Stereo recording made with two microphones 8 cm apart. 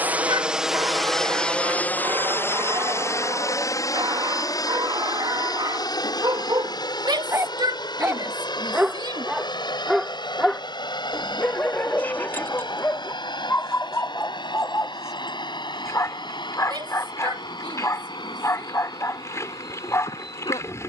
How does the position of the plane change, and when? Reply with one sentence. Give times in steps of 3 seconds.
You can hear the plane in the centre from 0 s and on the left from 3 s.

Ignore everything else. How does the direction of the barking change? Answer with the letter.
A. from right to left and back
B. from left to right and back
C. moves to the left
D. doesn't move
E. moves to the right
C.